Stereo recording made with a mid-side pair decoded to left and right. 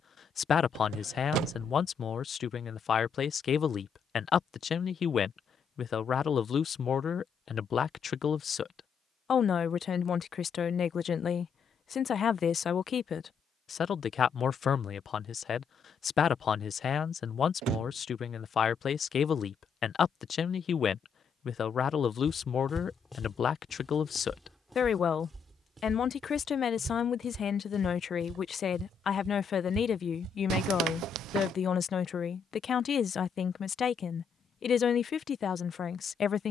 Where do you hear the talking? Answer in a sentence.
You can hear the talking on the left.